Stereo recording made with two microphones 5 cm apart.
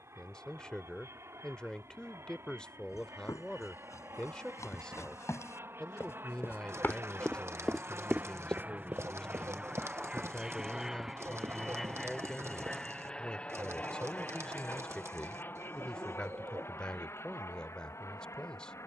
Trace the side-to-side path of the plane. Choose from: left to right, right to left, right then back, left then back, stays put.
right to left.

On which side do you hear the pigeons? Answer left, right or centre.
right.